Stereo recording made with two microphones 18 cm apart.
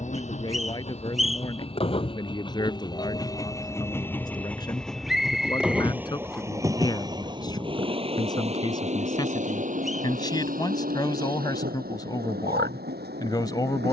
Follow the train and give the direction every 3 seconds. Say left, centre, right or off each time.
left, centre, right, right, right.